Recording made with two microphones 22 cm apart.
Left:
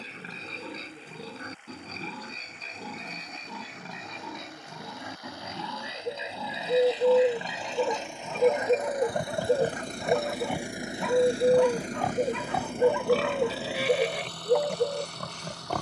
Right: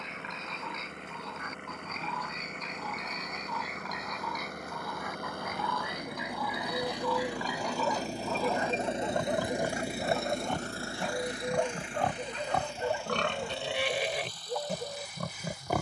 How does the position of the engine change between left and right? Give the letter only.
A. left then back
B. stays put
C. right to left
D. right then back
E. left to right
C.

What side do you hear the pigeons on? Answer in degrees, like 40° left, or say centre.
80° left.